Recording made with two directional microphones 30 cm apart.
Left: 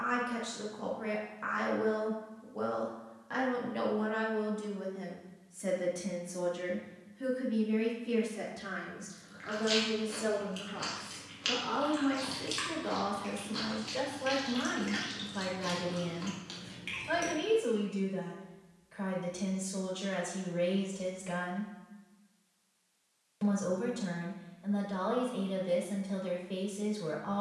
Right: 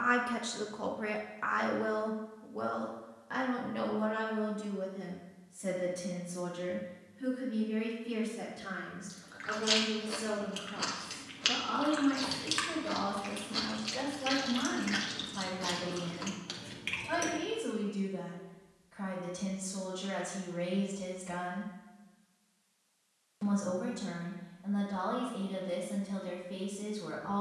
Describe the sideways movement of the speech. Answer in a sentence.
In this clip you hear the speech travel towards the left.